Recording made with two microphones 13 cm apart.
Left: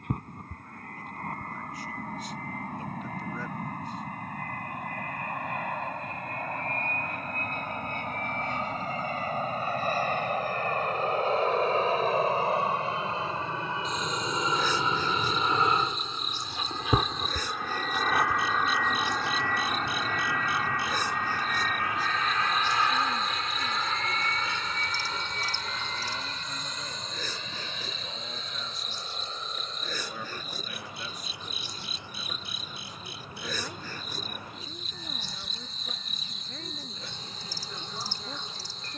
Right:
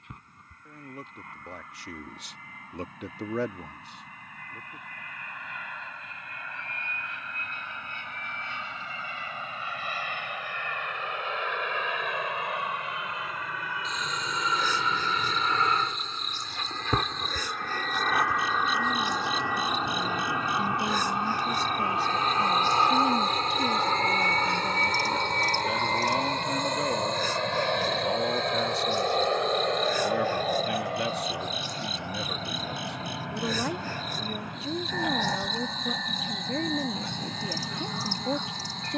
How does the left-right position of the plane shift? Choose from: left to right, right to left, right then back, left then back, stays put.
left to right.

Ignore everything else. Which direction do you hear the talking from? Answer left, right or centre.
right.